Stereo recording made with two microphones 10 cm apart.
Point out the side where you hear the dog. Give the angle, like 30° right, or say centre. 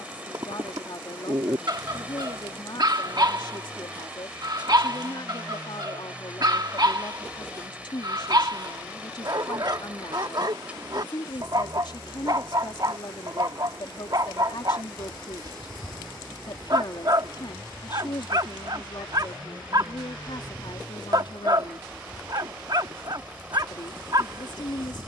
50° right.